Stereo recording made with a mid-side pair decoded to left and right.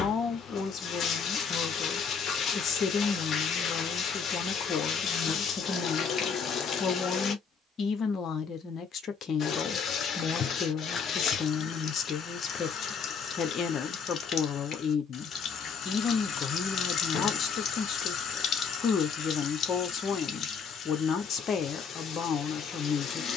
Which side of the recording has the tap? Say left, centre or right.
left.